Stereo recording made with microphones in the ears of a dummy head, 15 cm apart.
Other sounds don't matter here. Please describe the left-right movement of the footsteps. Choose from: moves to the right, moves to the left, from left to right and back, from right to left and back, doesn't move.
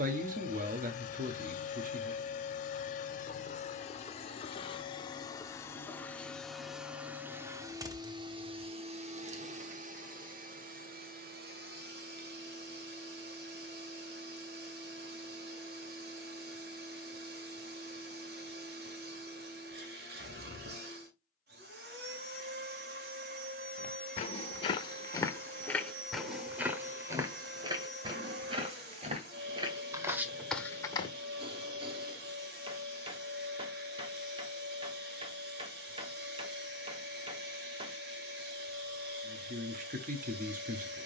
from left to right and back.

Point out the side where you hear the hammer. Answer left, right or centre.
right.